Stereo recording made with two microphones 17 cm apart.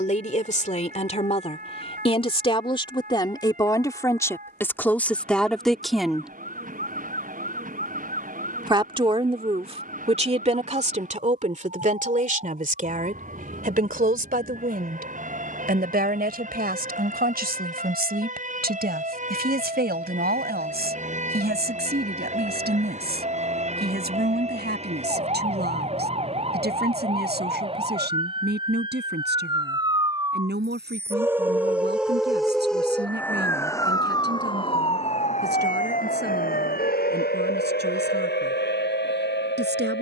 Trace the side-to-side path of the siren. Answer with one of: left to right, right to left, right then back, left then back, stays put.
right to left.